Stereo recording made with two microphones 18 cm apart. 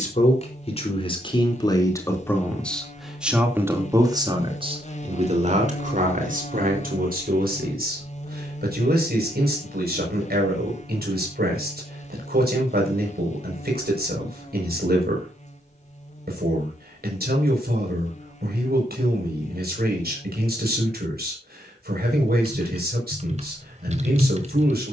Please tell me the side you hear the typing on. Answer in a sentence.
In this clip you hear the typing on the right.